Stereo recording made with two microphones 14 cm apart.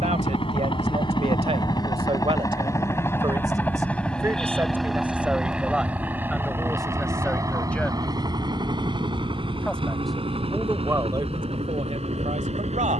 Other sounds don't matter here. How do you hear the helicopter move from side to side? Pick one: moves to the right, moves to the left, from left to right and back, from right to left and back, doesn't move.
moves to the right.